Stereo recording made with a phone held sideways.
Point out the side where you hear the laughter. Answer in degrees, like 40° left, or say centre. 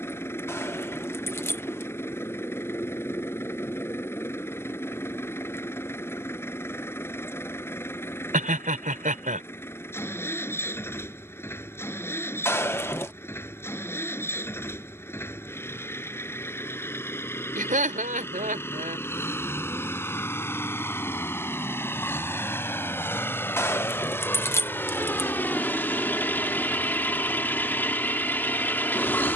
60° right.